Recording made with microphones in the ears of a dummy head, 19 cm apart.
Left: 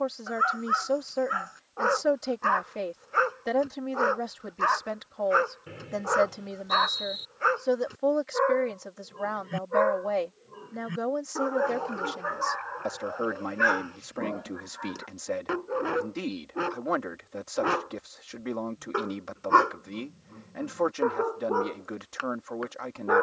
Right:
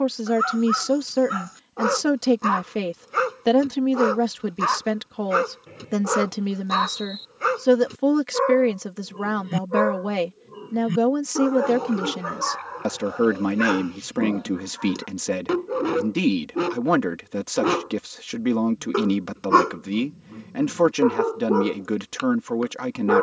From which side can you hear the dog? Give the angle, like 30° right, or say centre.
40° right.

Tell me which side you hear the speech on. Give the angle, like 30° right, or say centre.
70° right.